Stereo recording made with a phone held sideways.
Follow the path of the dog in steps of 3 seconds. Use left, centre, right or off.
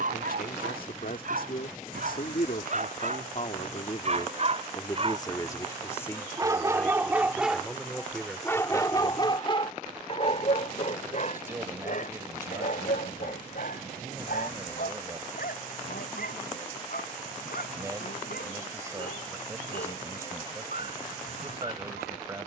right, right, centre, left, left, left, left, left.